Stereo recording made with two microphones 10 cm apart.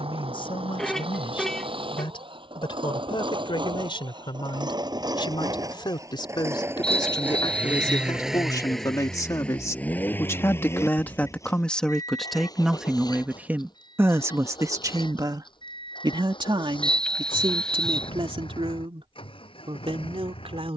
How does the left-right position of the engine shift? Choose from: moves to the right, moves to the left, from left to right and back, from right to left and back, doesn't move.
moves to the left.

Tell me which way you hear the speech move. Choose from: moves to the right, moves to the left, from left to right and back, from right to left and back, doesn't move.
moves to the right.